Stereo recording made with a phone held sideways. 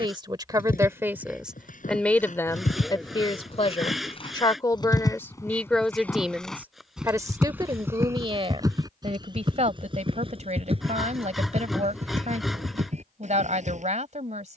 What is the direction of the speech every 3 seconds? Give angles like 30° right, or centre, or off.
10° right, 20° left, 20° right, 50° right, 50° right.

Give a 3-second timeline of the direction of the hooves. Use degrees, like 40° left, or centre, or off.
60° left, 30° left, 10° right, 40° right, 50° right.